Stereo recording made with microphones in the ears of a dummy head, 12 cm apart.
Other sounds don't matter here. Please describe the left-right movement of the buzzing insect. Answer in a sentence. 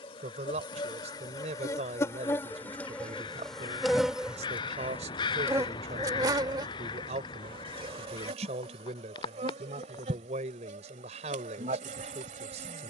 You can hear the buzzing insect go from the left side to the right.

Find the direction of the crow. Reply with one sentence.
In this clip you hear the crow on the left.